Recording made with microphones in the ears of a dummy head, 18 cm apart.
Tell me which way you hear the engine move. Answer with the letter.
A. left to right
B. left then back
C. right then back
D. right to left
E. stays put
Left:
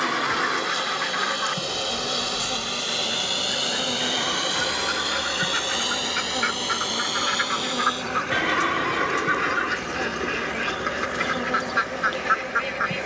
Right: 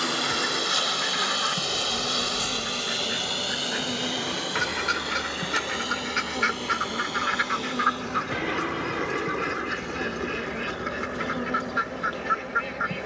D.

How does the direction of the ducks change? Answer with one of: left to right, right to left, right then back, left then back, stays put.
right then back.